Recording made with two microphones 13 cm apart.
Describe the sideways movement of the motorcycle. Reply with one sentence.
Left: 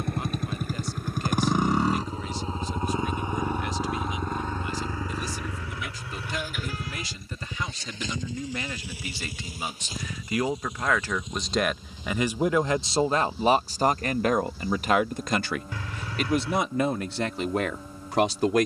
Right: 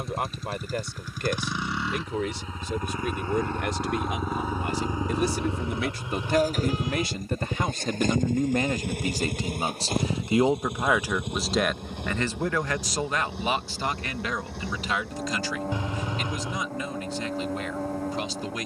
You can hear the motorcycle go from the left side to the right.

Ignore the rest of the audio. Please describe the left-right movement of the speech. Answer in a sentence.
You can hear the speech go from the right side to the left.